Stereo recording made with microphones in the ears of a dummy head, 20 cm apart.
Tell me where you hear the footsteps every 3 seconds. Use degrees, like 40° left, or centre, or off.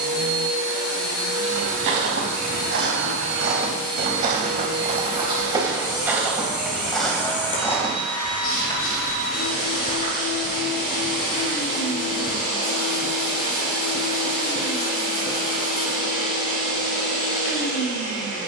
60° right, 30° right, 10° left, 30° left, off, off.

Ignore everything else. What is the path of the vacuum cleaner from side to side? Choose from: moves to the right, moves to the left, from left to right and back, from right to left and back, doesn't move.
doesn't move.